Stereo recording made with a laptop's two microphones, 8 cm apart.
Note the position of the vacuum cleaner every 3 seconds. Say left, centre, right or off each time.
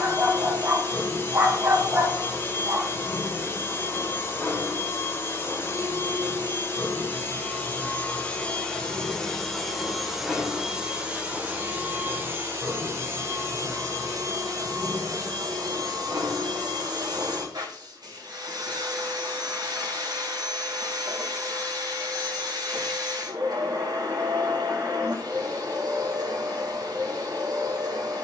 left, left, left, centre, right, right, right, right, right, right.